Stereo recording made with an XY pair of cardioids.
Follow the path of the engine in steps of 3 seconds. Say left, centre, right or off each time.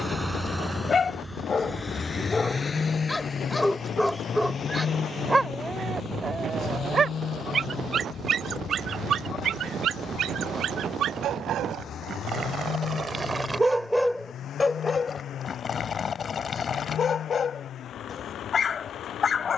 centre, left, left, left, left, left, left.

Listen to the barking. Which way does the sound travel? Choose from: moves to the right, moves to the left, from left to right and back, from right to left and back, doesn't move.
from left to right and back.